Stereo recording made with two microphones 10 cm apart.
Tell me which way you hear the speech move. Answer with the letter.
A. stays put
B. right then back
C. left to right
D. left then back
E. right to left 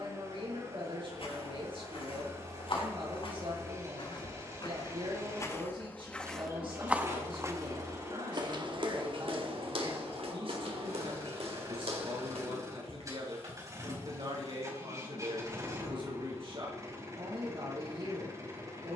A.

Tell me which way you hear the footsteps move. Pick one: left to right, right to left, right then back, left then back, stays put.
left to right.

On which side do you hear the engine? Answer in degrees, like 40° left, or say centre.
30° right.